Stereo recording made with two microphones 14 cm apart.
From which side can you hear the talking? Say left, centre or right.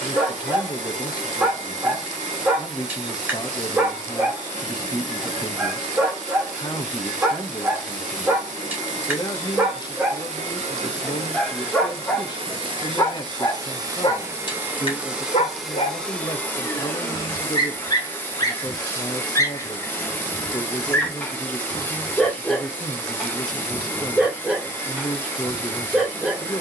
left.